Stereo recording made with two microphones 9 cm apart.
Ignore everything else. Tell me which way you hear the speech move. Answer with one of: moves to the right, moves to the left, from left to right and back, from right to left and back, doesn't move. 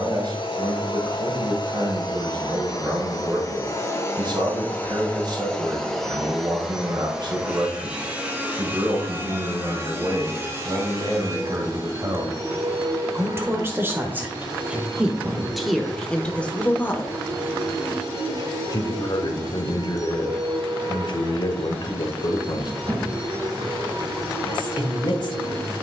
moves to the left.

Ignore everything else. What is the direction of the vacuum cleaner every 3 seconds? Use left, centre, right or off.
left, left, centre, right, right, right, right, right, right.